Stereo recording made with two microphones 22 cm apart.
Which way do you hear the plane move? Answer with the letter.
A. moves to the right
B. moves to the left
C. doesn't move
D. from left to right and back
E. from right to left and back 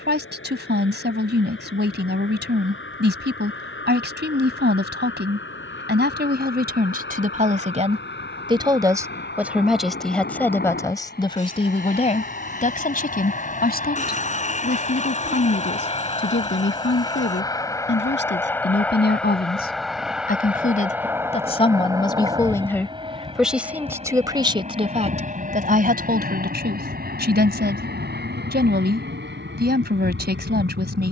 A.